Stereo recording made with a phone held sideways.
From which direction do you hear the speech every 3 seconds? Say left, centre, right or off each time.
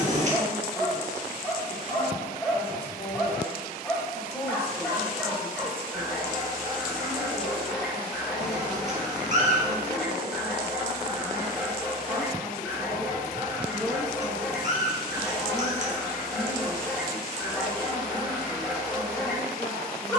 left, centre, right, right, centre, left, left.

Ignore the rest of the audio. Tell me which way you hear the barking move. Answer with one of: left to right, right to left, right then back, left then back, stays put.
stays put.